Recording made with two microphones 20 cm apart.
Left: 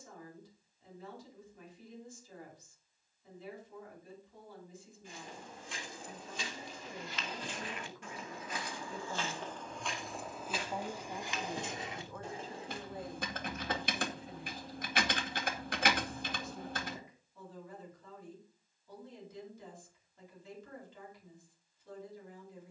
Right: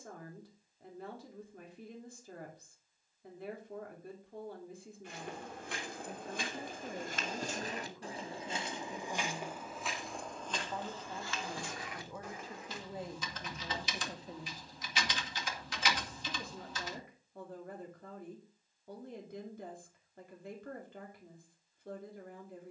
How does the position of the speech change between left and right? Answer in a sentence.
In this clip you hear the speech move from right to left and back again.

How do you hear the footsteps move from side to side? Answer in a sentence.
You can hear the footsteps go from the right side to the left.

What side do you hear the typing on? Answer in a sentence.
In this clip you hear the typing on the left.